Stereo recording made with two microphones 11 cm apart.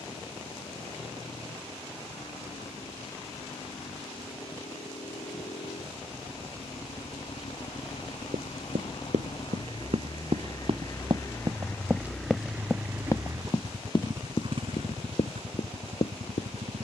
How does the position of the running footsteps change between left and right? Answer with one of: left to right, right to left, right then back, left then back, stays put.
right to left.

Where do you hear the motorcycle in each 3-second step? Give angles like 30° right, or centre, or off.
70° left, 70° left, 60° left, 40° left, 30° right, 60° right.